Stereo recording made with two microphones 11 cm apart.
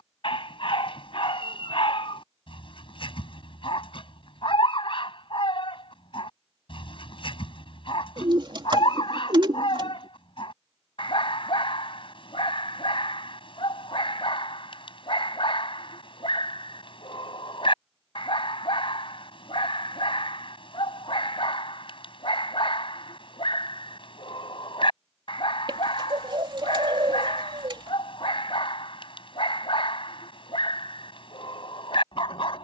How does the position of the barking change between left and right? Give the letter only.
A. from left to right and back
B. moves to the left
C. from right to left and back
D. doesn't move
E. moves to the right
D.